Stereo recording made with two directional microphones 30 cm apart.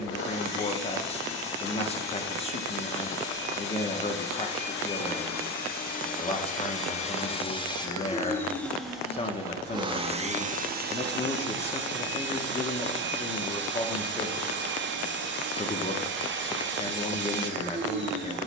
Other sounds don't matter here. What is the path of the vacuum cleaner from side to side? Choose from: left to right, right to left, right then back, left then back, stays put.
left to right.